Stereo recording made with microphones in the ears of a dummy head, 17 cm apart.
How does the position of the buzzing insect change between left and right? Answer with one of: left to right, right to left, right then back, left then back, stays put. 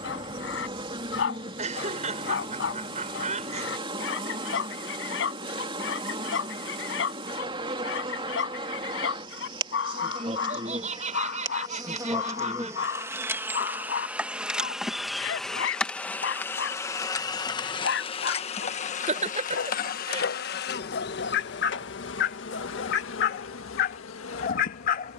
right to left.